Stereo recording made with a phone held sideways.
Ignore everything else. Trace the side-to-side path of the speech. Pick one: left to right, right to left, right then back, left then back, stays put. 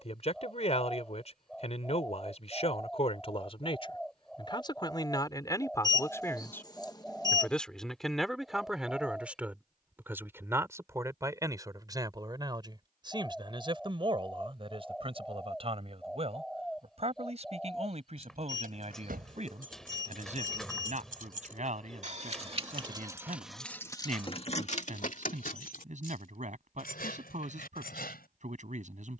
left to right.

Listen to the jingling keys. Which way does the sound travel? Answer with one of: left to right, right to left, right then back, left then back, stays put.
right to left.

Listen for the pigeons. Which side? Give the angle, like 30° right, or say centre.
centre.